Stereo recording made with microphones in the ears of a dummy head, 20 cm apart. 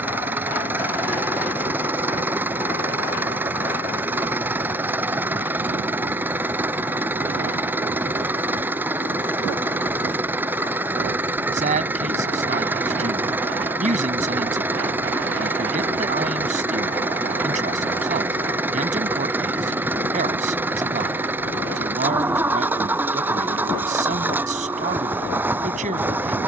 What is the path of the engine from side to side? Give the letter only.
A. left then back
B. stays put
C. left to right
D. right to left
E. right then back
B.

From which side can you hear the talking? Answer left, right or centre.
right.